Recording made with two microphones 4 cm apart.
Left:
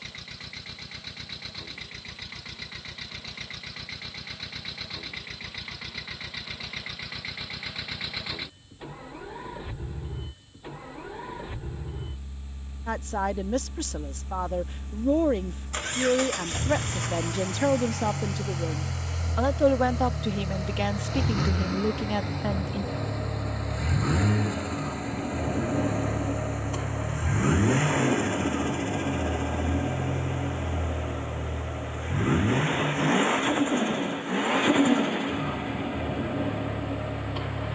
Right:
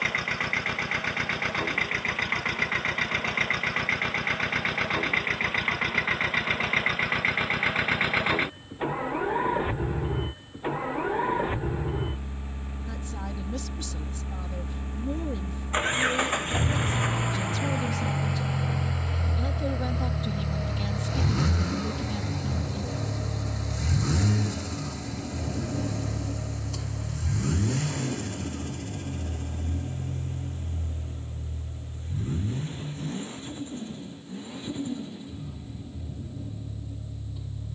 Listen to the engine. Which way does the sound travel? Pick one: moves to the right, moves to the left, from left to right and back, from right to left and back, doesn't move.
moves to the left.